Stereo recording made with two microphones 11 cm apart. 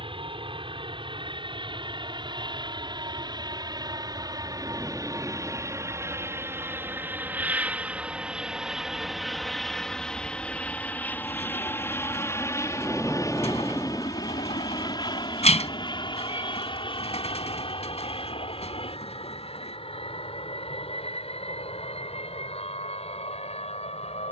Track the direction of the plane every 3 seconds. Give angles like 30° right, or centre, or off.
50° right, 40° right, 10° right, 10° left, 30° left, 40° left, 50° left, 60° left.